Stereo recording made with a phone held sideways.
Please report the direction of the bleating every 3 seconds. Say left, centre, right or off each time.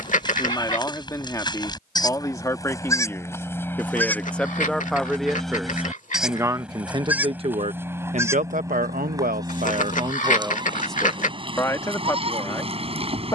left, centre, centre, right, right.